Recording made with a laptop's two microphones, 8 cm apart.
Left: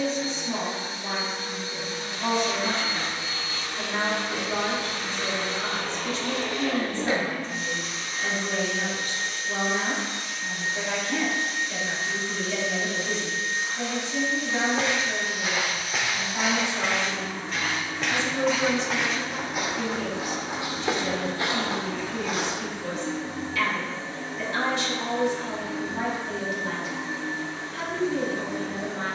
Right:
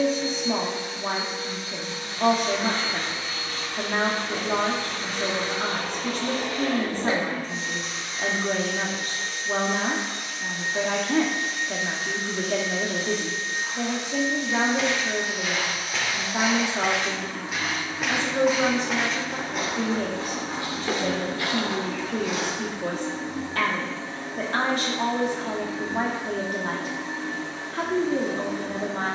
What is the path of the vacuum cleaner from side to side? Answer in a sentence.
In this clip you hear the vacuum cleaner go from the left side to the right.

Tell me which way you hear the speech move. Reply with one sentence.
In this clip you hear the speech stay in one place.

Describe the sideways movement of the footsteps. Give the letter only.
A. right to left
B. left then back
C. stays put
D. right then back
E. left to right
D.